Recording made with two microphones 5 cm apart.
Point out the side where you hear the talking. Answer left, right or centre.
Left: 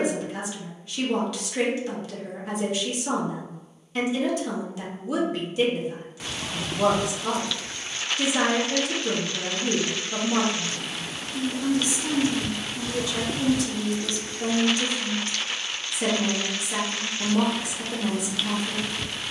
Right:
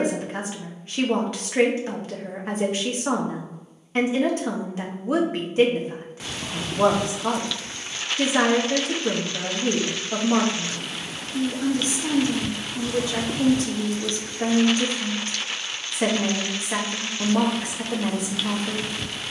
right.